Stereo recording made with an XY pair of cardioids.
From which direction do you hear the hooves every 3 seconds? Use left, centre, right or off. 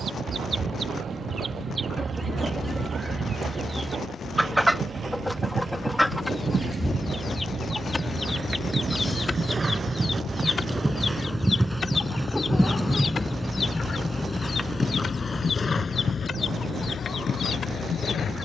right, right, right, right, centre, left.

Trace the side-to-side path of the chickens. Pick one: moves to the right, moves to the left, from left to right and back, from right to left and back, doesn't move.
moves to the left.